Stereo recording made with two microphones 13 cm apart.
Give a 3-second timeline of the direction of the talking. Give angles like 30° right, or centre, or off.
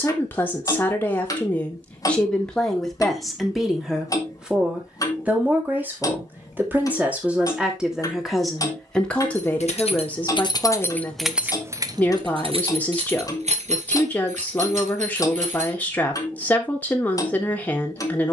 10° left, 10° right, 10° right, 10° left, 10° left, 10° left.